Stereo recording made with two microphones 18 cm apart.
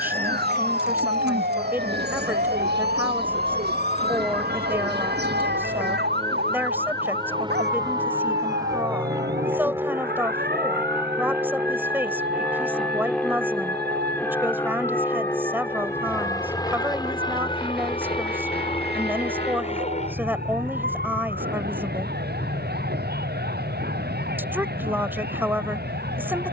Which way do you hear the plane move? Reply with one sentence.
You can hear the plane go from the right side to the left.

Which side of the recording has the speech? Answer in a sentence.
In this clip you hear the speech in the centre.